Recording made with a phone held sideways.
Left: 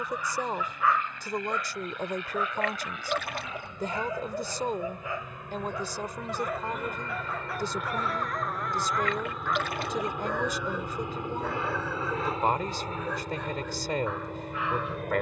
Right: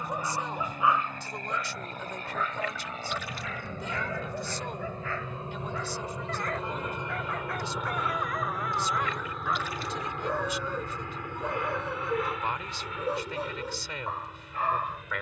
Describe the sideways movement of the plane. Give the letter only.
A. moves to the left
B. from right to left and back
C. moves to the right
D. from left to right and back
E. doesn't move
A.